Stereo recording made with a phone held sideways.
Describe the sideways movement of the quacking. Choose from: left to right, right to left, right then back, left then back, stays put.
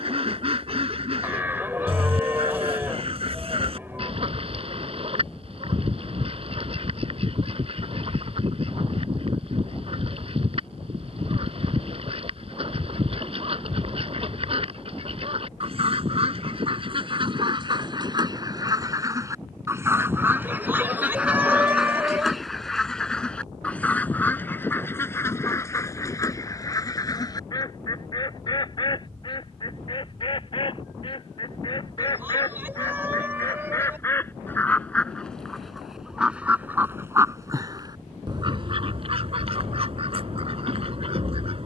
left then back.